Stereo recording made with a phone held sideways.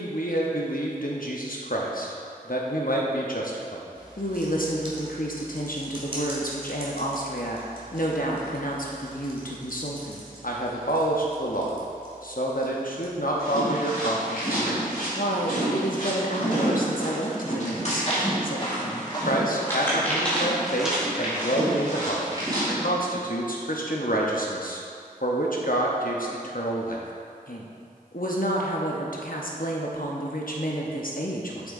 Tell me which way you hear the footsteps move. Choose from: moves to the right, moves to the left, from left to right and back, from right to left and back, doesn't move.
moves to the right.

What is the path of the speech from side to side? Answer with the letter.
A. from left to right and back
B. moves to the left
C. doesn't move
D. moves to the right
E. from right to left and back
C.